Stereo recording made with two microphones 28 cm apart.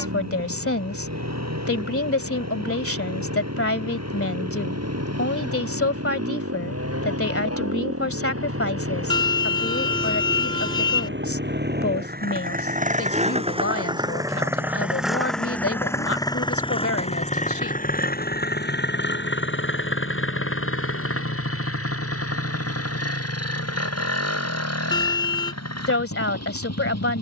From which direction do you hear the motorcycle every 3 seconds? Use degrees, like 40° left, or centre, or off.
70° right, 70° right, 60° right, 50° right, 20° right, 20° left, 40° left, 60° left, 70° left.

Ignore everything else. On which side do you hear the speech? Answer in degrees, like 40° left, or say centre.
50° left.